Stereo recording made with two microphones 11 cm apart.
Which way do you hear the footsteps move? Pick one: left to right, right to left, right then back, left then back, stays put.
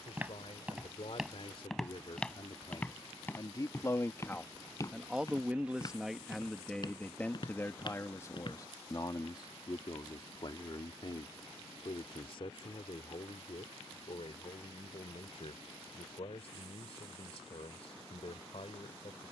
right to left.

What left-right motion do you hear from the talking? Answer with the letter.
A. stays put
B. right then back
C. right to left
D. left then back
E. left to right
B.